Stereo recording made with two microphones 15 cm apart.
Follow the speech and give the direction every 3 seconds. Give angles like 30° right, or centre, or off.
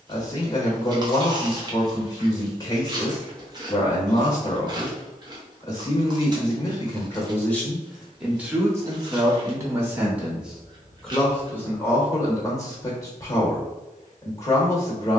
30° left, 30° left, 10° left, 10° right, 20° left.